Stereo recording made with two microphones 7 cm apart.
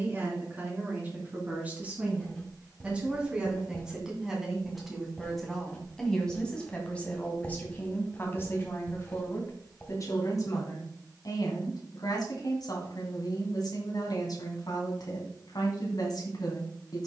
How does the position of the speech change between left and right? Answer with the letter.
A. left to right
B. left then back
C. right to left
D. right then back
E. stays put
C.